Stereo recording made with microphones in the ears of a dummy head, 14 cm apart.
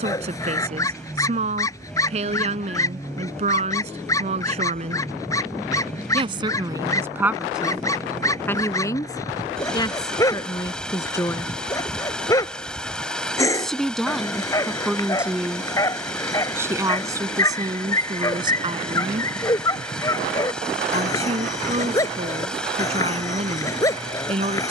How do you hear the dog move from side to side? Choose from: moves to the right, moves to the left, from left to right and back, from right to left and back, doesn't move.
doesn't move.